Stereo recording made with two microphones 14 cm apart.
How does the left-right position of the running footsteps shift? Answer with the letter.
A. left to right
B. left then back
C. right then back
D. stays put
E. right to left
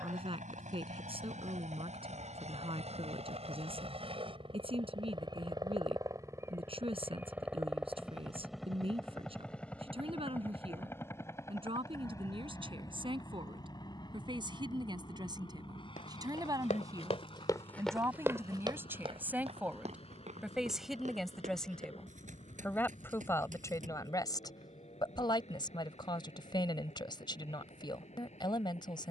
A.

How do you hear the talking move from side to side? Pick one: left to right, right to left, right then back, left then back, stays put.
right to left.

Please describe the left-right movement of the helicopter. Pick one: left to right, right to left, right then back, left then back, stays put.
right to left.